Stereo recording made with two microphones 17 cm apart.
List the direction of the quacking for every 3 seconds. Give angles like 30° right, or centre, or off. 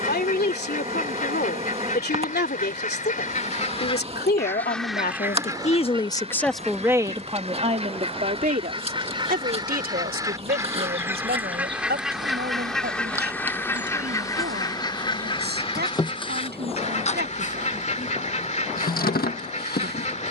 50° left, 10° left, 40° right, 20° right, 10° left, 40° left, 40° left.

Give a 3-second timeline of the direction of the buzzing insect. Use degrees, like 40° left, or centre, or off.
40° right, 40° right, 40° right, 30° right, 10° right, 30° left, 60° left.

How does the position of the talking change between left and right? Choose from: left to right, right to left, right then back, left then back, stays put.
left to right.